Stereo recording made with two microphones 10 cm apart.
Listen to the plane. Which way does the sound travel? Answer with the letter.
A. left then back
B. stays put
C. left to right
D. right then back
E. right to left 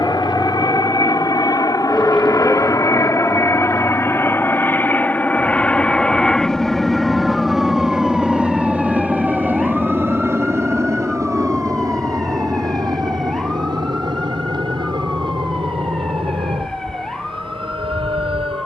C.